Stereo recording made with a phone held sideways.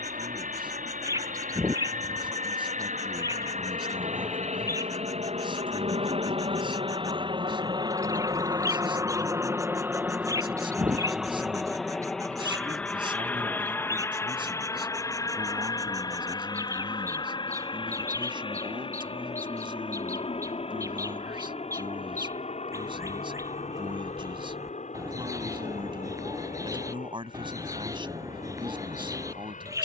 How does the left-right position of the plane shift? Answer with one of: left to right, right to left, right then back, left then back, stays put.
right to left.